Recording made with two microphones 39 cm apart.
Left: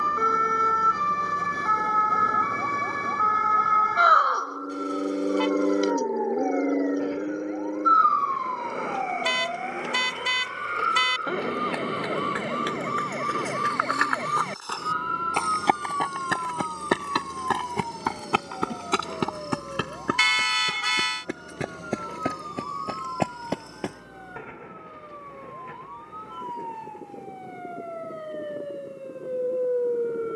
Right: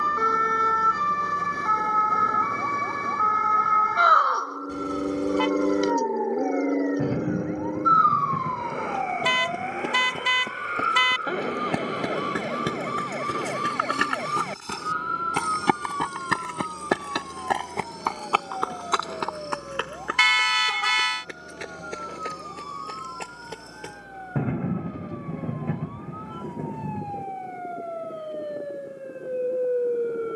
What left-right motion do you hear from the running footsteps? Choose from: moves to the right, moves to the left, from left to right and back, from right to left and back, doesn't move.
moves to the left.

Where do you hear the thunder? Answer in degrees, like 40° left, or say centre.
60° right.